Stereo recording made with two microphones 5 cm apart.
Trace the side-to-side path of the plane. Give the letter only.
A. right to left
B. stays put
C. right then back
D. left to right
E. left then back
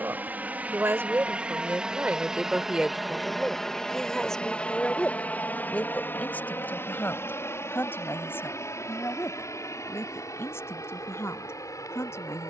A.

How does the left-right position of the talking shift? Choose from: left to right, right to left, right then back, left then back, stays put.
right to left.